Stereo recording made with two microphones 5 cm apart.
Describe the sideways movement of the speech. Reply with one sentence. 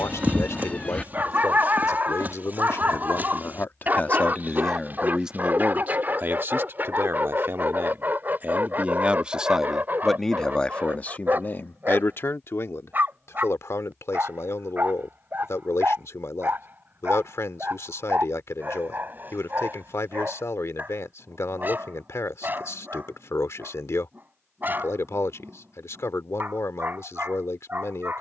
In this clip you hear the speech move from left to right and back again.